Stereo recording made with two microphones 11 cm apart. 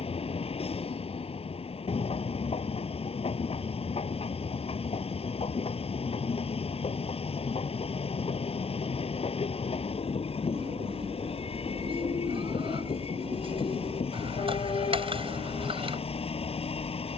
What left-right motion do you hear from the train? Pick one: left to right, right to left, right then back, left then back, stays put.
stays put.